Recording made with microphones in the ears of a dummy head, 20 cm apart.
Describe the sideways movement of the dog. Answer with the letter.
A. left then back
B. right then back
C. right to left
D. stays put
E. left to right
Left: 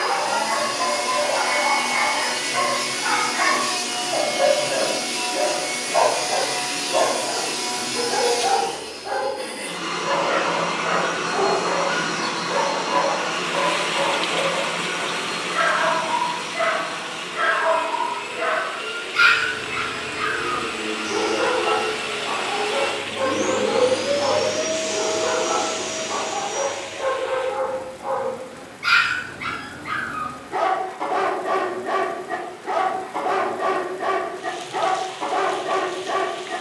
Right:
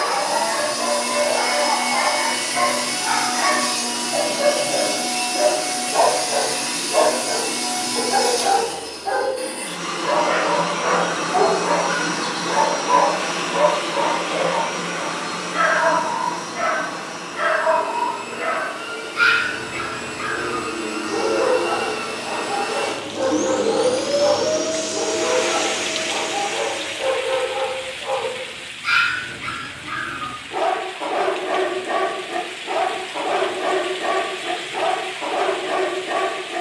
B.